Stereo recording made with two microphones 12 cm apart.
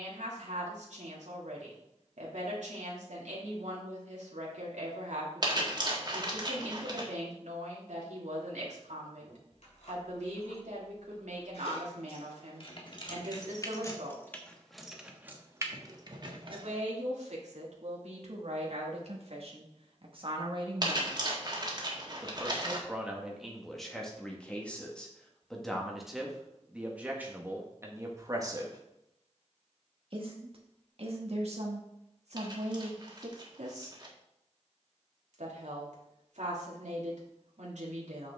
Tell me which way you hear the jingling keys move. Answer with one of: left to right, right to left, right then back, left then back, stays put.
left to right.